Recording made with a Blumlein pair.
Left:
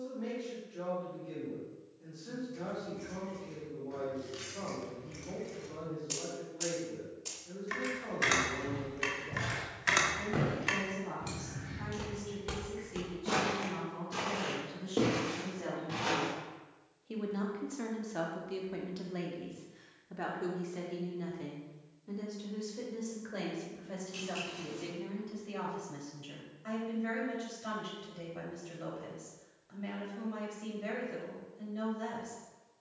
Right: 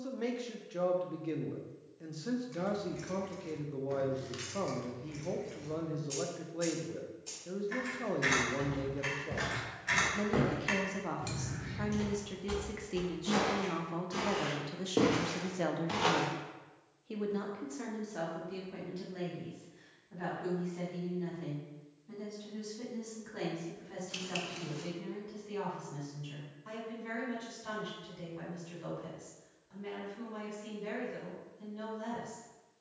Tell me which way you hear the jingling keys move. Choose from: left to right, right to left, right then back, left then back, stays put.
left then back.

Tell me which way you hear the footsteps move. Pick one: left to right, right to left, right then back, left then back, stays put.
left then back.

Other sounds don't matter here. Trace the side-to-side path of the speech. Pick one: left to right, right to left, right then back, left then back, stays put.
right to left.